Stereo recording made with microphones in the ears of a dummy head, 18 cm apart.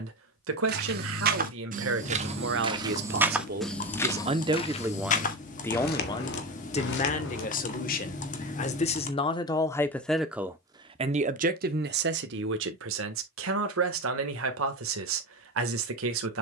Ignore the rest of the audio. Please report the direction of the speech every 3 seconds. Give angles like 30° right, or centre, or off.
70° right, 20° right, 40° left, 10° right, 70° right, 70° right.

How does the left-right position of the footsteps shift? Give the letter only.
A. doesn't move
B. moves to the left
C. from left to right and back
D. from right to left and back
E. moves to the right
B.